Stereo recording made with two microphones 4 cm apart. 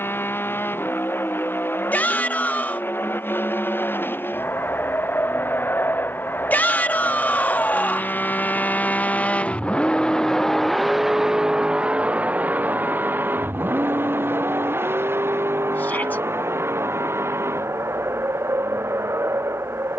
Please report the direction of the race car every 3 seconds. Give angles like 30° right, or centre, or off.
80° left, 70° left, 60° left, 10° left, 50° right, 70° right, 80° right.